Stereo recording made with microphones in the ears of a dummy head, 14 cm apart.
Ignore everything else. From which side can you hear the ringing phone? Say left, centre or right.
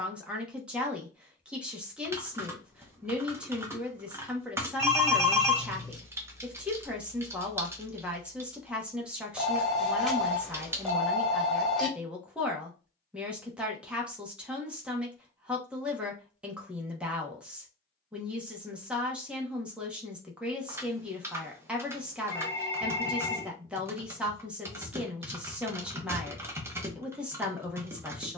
centre.